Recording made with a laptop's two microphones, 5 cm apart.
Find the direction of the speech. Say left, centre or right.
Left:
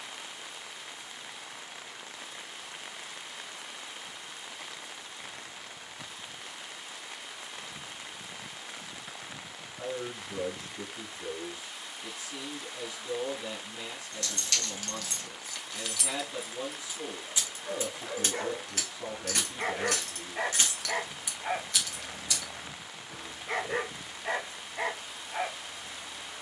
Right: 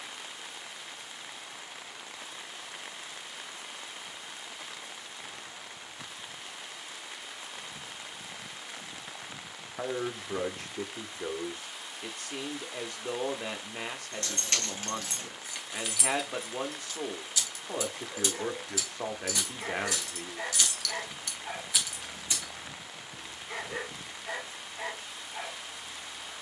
right.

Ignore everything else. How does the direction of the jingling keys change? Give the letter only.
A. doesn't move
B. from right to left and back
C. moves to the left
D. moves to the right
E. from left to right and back
B.